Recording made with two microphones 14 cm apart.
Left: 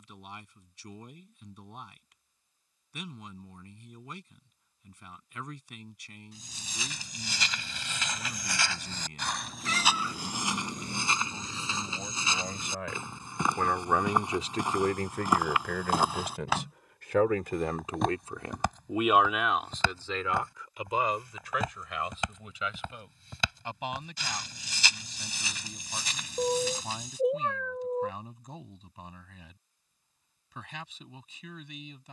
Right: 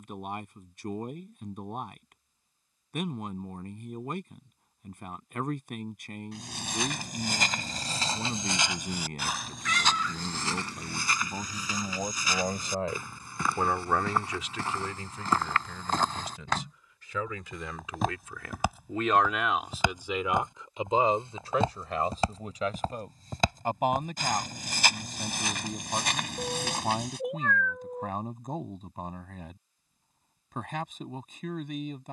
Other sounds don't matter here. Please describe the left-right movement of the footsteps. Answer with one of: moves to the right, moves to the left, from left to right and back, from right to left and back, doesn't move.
from right to left and back.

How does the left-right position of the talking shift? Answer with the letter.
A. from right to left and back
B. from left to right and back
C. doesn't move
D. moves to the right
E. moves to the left
A.